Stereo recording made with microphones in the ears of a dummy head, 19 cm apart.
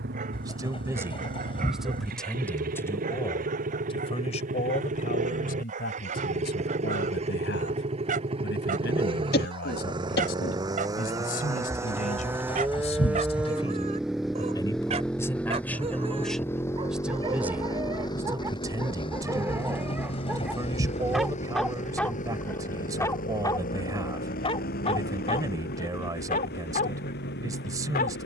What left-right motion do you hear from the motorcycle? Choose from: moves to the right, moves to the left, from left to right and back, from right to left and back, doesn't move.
moves to the left.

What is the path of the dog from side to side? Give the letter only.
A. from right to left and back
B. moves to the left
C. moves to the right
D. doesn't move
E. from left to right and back
B.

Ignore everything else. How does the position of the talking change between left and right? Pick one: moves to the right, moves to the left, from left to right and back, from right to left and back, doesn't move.
from right to left and back.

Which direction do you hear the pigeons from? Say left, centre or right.
left.